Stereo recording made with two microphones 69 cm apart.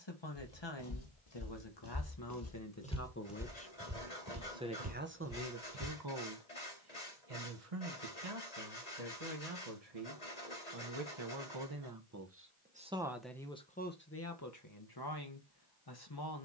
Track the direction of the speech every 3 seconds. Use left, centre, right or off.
left, centre, right, right, centre, left.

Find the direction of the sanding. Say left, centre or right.
left.